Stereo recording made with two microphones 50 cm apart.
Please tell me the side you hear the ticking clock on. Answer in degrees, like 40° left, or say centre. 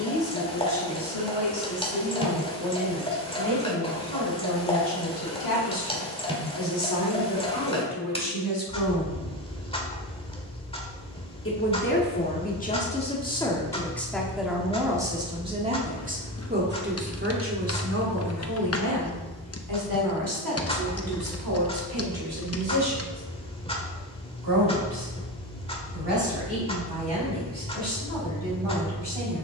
10° left.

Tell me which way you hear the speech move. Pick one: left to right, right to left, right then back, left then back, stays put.
left to right.